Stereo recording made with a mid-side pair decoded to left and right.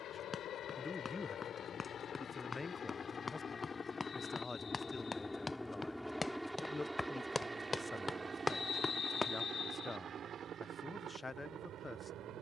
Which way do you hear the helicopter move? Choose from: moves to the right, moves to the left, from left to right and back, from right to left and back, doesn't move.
moves to the right.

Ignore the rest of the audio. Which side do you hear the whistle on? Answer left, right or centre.
left.